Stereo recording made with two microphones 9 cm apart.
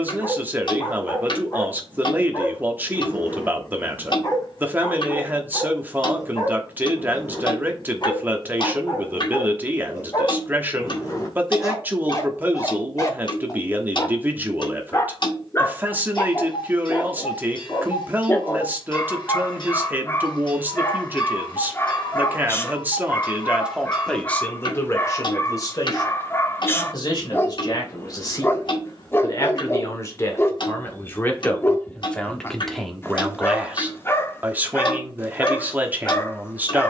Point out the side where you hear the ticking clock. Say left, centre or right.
left.